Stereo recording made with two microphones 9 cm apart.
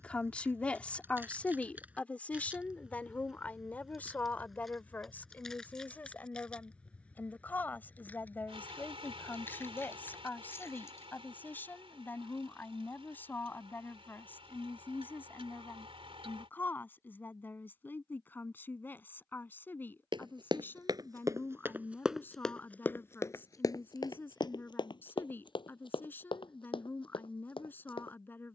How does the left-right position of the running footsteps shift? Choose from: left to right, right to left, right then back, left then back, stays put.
right to left.